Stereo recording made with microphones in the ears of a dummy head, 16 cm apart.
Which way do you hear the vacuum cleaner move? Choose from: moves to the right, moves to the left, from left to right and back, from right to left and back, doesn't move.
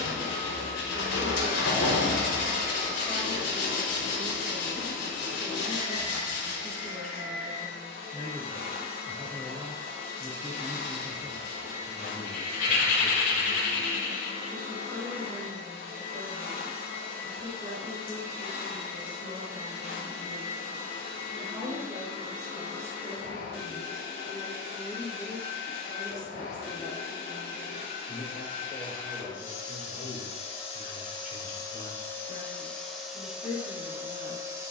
moves to the right.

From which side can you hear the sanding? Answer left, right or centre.
left.